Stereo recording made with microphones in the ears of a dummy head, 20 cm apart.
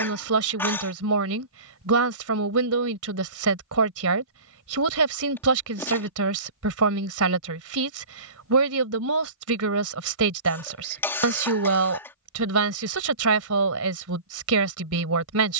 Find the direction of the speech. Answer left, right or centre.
right.